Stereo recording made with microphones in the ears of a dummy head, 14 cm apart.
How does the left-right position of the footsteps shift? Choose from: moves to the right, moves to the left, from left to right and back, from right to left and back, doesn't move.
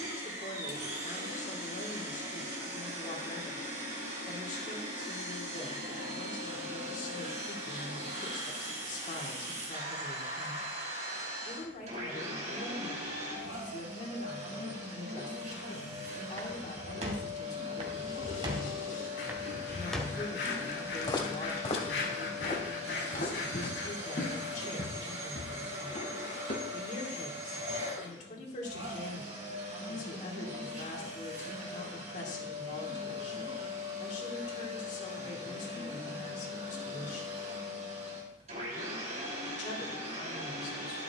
moves to the left.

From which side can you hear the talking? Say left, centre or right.
left.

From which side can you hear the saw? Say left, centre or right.
left.